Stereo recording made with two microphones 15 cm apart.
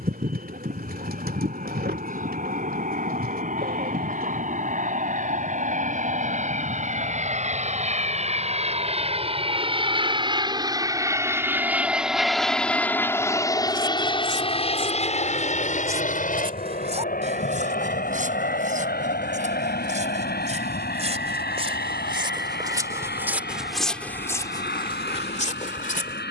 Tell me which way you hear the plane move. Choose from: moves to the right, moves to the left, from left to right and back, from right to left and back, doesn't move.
moves to the left.